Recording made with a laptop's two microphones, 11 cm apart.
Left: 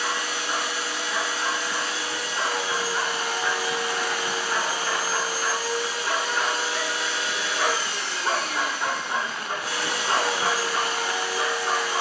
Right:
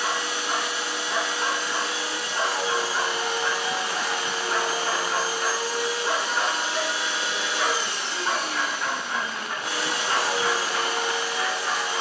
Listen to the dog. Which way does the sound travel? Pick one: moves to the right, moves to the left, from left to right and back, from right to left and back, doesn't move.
moves to the left.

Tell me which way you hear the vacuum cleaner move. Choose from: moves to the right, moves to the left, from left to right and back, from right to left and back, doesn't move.
doesn't move.